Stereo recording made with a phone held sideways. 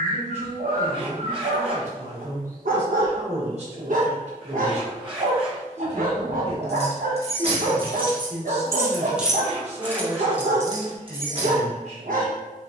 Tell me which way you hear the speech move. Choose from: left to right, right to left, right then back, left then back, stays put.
stays put.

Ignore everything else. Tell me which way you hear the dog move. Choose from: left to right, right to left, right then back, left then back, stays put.
stays put.